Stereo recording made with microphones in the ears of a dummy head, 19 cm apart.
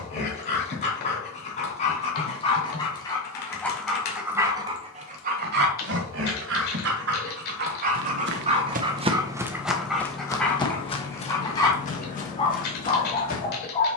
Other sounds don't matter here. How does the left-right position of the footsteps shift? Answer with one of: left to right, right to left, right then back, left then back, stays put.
right to left.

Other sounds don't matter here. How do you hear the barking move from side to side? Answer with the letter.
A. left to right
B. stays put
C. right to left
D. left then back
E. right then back
E.